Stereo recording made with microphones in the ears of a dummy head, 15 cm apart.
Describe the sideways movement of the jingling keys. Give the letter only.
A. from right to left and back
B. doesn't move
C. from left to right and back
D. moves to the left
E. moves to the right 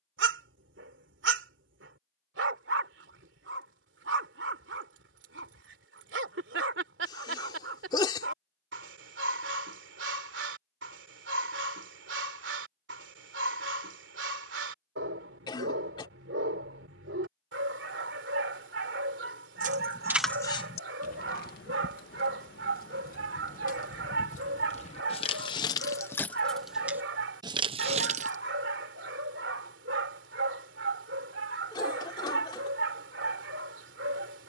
A.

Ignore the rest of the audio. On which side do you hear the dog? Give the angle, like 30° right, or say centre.
70° right.